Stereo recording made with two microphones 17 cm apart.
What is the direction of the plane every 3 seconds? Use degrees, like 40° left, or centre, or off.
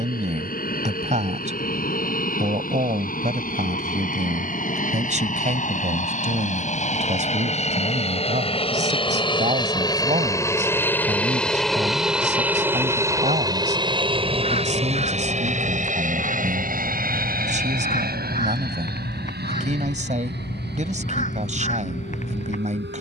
60° left, 60° left, 40° left, 20° left, 20° right, 50° right, 60° right, 70° right.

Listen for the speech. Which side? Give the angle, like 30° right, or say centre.
40° right.